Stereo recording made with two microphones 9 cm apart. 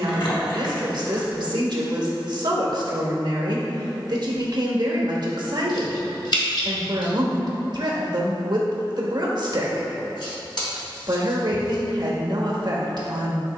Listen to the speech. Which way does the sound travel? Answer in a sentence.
In this clip you hear the speech stay in one place.